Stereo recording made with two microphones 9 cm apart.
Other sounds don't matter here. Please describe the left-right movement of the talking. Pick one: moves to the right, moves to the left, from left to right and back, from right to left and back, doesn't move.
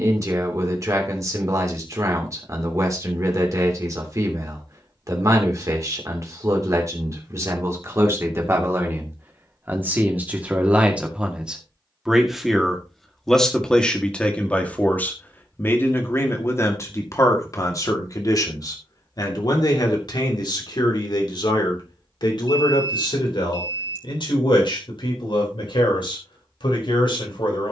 moves to the left.